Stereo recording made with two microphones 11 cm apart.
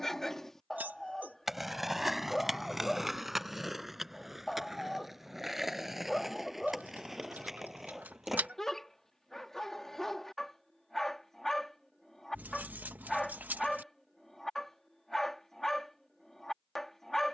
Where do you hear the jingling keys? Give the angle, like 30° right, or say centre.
20° right.